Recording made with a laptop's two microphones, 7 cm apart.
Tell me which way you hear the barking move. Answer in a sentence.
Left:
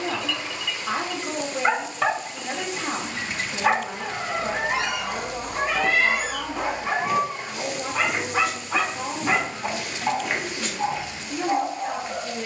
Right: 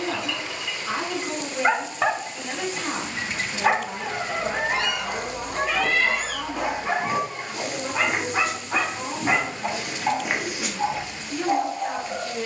In this clip you hear the barking stay put.